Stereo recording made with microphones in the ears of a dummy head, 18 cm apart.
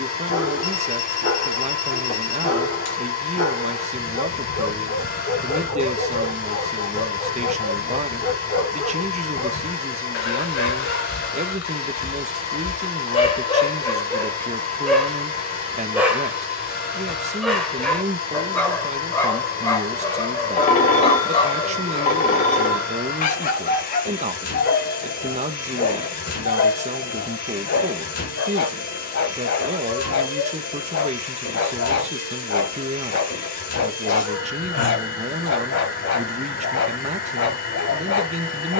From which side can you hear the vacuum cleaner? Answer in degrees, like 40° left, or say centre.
50° left.